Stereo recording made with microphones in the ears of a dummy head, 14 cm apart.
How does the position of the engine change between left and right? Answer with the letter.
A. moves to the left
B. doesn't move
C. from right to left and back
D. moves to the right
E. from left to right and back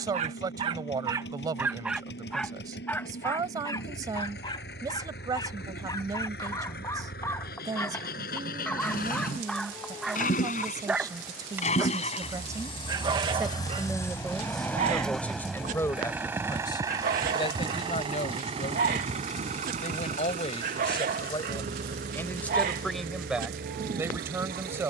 D.